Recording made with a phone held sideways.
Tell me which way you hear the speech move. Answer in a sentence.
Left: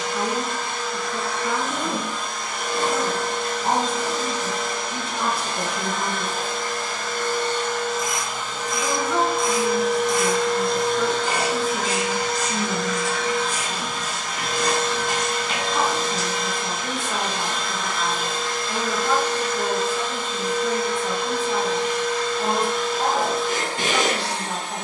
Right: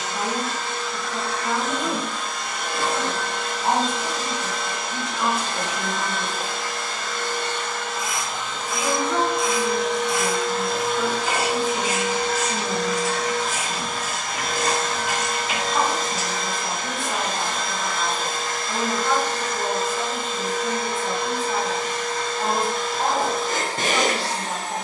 In this clip you hear the speech stay in one place.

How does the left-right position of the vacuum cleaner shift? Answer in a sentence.
You can hear the vacuum cleaner move from left to right.